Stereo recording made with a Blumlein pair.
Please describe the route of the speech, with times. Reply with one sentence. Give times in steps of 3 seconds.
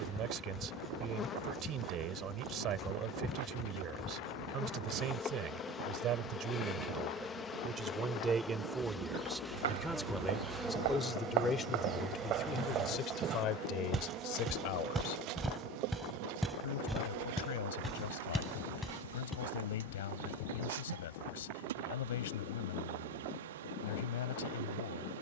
In this clip you hear the speech on the right from 0 s, in the centre from 9 s and on the left from 12 s.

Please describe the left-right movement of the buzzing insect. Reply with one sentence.
You can hear the buzzing insect move to the right.